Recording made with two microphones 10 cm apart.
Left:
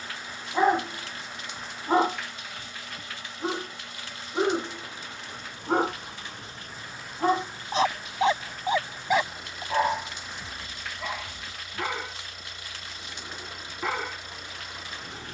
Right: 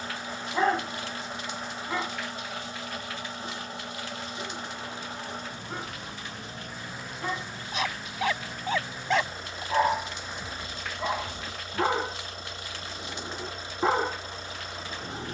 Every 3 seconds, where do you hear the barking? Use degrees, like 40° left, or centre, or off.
30° left, 60° left, 30° left, 10° right, 30° right.